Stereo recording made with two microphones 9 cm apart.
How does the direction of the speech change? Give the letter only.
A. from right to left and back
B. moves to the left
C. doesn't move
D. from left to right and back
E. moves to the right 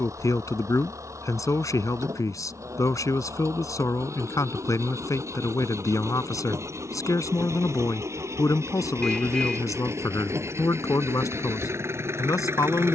C.